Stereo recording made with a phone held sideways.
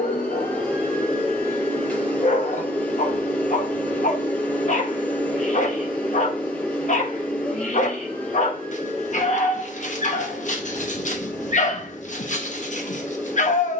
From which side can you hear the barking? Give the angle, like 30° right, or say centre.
50° left.